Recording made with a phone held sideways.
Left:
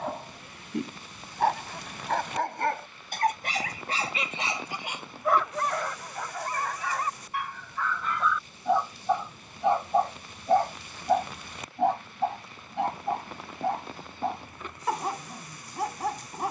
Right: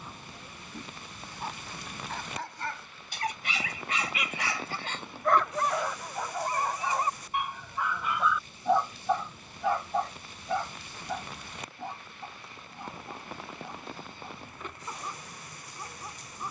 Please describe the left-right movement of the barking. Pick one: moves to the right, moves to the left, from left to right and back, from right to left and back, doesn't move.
from left to right and back.